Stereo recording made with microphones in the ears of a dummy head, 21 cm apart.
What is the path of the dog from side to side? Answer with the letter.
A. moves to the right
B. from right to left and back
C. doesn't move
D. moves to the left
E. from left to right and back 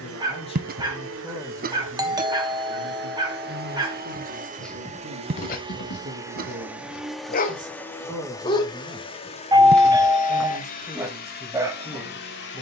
B.